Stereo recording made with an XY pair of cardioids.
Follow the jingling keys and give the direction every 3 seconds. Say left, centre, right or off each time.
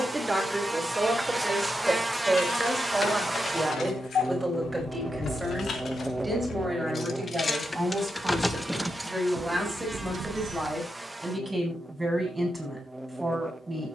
left, left, left, right, off.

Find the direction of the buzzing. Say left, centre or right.
centre.